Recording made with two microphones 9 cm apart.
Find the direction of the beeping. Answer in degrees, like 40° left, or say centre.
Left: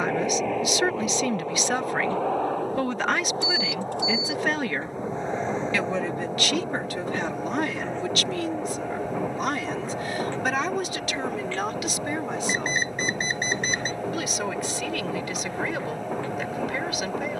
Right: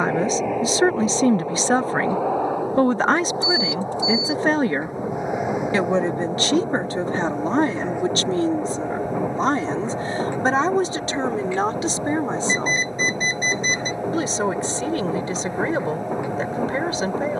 70° left.